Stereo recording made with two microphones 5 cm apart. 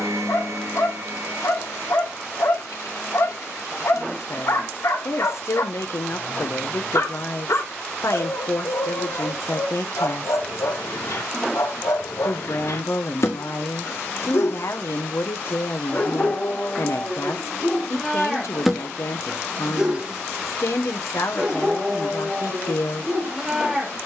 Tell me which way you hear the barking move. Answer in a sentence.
In this clip you hear the barking move from left to right.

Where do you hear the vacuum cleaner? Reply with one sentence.
You can hear the vacuum cleaner on the right.